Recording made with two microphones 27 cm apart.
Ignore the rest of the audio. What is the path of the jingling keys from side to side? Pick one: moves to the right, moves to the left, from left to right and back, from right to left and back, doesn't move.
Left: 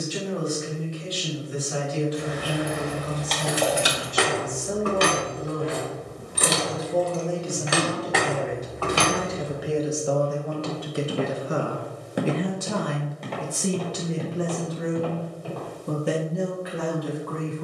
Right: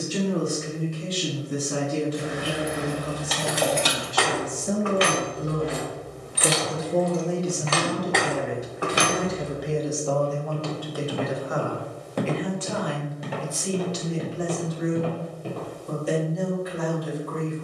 from right to left and back.